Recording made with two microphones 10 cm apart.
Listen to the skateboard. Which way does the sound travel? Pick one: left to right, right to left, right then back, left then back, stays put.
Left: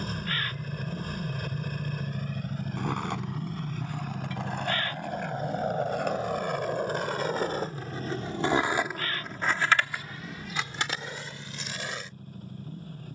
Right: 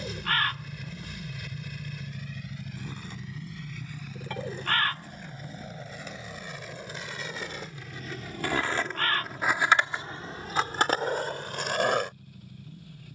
left to right.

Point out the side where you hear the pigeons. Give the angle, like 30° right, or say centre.
70° right.